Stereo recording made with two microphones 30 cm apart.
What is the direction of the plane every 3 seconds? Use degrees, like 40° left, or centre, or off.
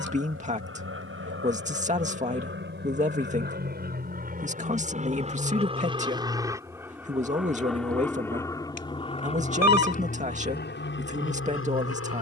40° right, 30° right, centre, 30° left.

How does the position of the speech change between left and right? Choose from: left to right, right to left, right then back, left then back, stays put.
stays put.